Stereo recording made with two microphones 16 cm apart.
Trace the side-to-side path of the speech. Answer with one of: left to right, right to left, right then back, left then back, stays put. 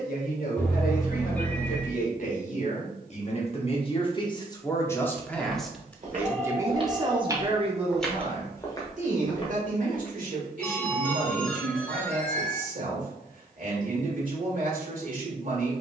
left to right.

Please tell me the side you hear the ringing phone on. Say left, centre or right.
centre.